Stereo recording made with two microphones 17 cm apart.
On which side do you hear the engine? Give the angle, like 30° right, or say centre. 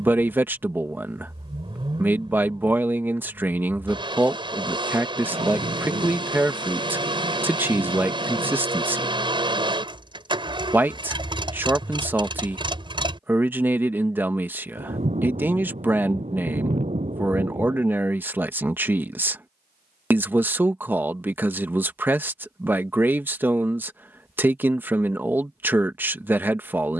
30° right.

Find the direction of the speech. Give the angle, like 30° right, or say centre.
10° right.